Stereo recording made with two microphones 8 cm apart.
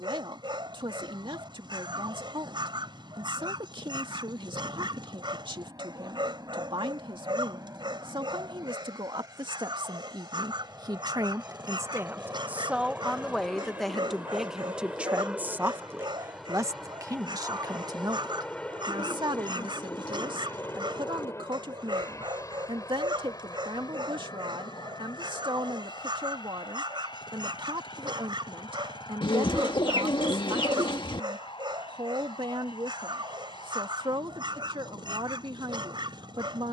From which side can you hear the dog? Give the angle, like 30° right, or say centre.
70° right.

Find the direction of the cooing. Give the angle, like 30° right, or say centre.
70° left.